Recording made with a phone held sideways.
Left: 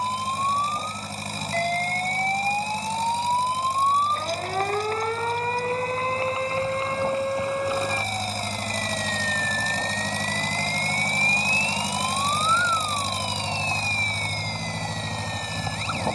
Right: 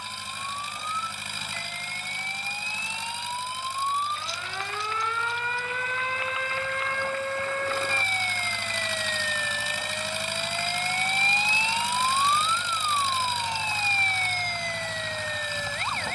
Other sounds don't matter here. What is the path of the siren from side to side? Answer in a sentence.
You can hear the siren move from left to right.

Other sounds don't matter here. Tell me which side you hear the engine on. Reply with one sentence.
In this clip you hear the engine on the left.